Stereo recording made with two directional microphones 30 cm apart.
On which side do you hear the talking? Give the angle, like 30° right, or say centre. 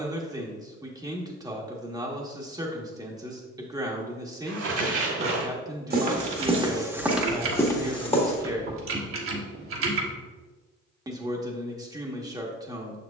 10° right.